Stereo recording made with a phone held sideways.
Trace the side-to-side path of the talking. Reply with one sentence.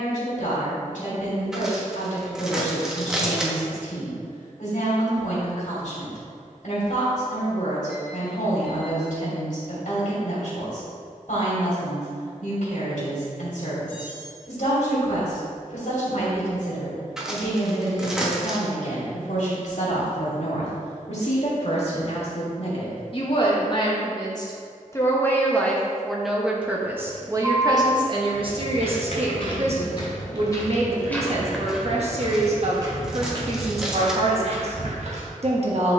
In this clip you hear the talking move to the right.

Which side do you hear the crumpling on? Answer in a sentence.
You can hear the crumpling in the centre.